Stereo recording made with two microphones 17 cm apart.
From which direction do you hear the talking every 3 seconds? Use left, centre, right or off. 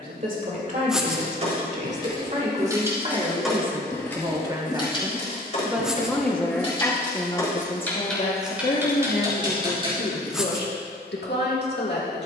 right, right, left, left.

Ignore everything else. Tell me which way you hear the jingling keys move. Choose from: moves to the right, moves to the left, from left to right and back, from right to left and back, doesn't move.
from right to left and back.